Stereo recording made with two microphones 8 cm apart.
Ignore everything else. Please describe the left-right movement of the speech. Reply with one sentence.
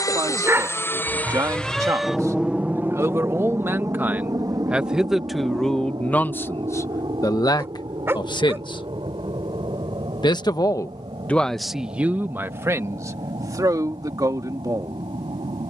In this clip you hear the speech move from right to left and back again.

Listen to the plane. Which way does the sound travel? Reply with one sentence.
You can hear the plane travel towards the right.